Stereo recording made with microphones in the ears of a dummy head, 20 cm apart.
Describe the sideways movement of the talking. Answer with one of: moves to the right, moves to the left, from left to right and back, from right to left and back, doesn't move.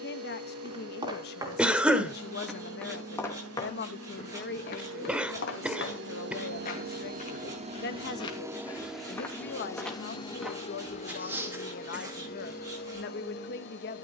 doesn't move.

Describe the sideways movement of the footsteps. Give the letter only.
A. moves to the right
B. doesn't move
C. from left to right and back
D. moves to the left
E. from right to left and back
E.